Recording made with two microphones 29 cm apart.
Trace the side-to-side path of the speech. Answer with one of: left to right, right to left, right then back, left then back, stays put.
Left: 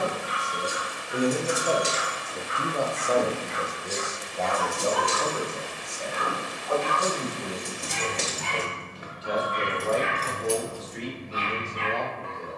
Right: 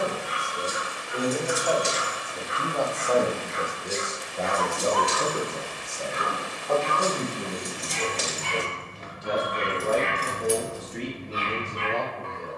left to right.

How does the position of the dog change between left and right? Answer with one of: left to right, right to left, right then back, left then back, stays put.
left then back.